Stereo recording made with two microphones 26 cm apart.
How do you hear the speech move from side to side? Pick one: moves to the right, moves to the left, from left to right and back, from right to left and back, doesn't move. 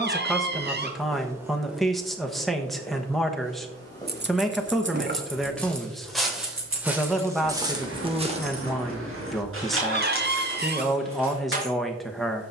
doesn't move.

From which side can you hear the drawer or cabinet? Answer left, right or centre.
right.